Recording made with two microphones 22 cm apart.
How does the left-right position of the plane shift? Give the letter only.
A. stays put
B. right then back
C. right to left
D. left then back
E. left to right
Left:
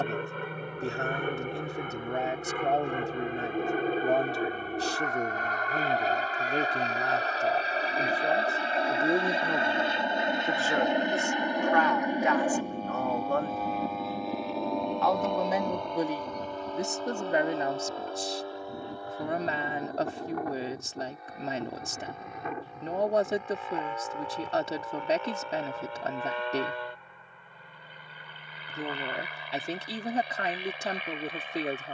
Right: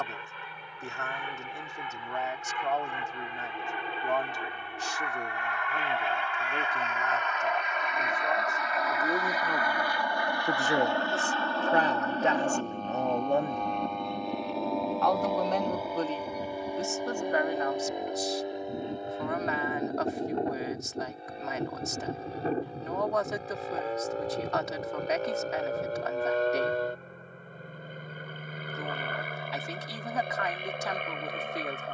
E.